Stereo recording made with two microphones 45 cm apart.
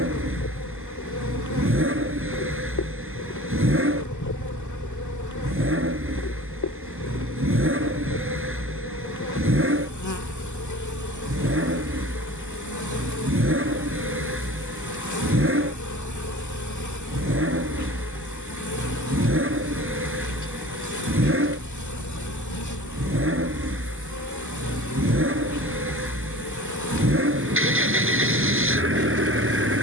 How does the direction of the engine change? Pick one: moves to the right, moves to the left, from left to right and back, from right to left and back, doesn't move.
doesn't move.